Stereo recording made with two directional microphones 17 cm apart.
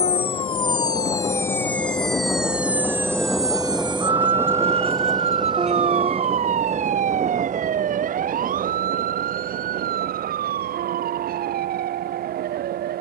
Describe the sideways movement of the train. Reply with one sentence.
In this clip you hear the train move to the right.